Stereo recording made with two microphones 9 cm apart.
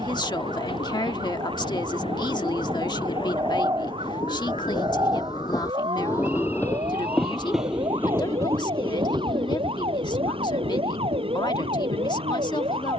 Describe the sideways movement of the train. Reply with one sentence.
You can hear the train go from the left side to the right.